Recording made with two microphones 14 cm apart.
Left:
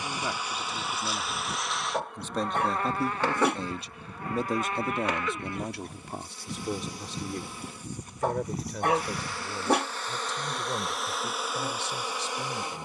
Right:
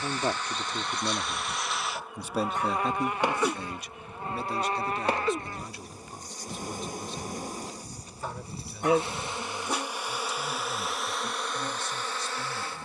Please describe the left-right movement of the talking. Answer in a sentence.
In this clip you hear the talking travel towards the left.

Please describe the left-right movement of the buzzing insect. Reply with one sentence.
In this clip you hear the buzzing insect move from left to right and back again.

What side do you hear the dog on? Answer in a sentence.
In this clip you hear the dog on the left.